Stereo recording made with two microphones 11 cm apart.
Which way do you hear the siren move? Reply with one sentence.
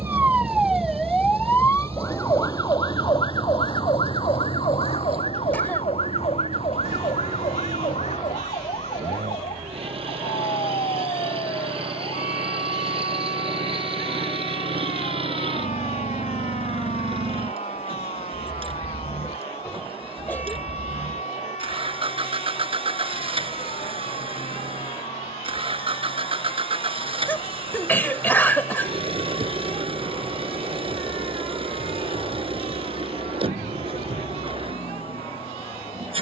In this clip you hear the siren move from right to left.